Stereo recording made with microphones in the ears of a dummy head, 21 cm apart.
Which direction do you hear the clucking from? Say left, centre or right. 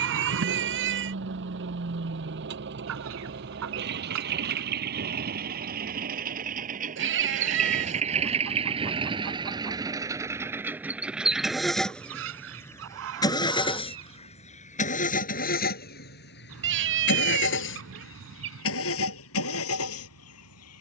right.